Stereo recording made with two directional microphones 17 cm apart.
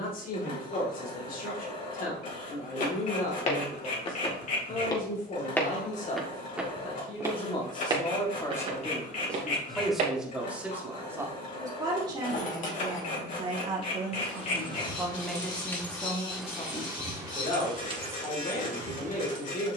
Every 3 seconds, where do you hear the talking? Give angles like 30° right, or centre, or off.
50° left, 50° left, 30° left, 10° right, 30° right, 30° left, 50° left.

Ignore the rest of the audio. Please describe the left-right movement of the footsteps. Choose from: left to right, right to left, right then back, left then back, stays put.
left to right.